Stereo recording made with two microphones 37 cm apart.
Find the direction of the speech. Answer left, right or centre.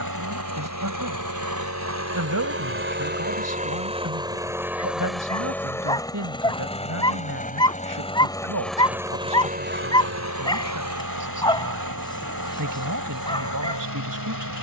right.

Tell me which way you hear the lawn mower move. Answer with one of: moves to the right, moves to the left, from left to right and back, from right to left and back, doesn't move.
from right to left and back.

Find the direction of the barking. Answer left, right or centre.
centre.